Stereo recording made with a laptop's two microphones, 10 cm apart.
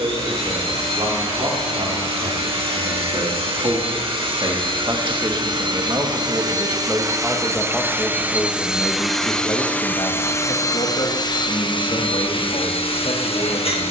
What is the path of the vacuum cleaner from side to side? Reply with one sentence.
In this clip you hear the vacuum cleaner travel towards the left.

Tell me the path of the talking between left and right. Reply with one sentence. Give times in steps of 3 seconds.
In this clip you hear the talking on the right from 0 s, in the centre from 6 s and on the left from 9 s.